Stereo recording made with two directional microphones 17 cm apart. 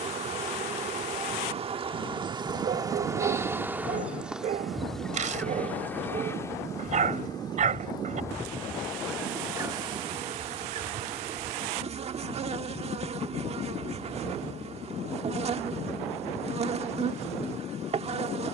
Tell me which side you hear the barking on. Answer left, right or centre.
right.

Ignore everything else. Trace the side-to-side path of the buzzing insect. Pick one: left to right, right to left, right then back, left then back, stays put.
left then back.